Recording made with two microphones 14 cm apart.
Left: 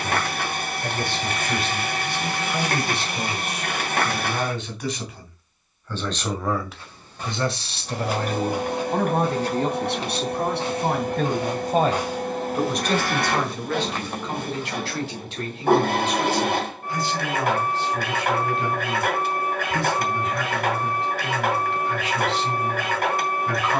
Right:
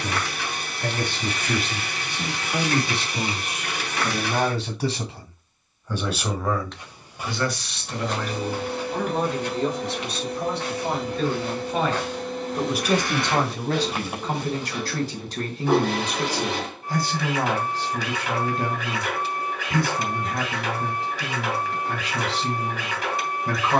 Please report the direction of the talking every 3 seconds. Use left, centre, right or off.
right, right, left, left, right, right, right, right.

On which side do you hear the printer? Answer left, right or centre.
left.